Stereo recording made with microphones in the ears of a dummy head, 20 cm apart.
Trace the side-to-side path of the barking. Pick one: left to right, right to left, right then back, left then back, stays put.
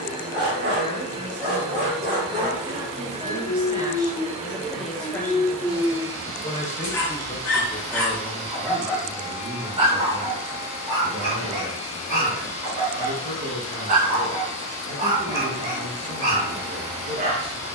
left then back.